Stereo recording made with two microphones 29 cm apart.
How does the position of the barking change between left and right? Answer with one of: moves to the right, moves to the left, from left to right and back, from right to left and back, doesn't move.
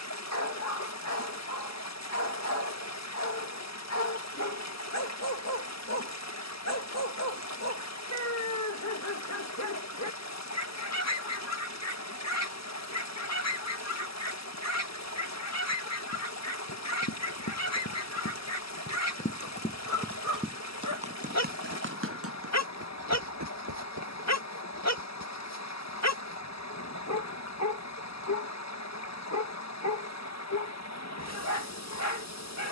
doesn't move.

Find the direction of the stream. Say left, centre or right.
left.